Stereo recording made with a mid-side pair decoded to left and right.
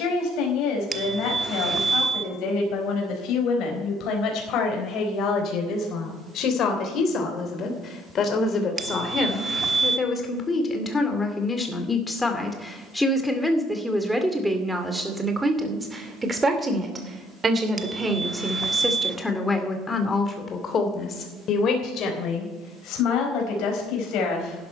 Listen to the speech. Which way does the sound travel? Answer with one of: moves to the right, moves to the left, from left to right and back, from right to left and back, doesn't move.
from left to right and back.